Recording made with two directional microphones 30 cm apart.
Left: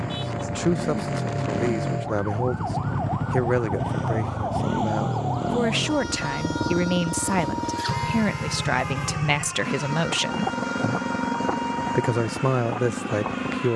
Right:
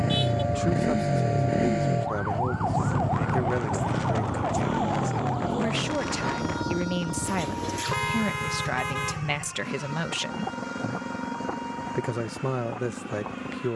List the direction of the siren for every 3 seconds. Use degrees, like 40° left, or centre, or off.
30° right, 10° left, 40° left, 50° left, 60° left.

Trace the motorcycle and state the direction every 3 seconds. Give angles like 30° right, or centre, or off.
20° right, 20° left, 40° left, 50° left, 50° left.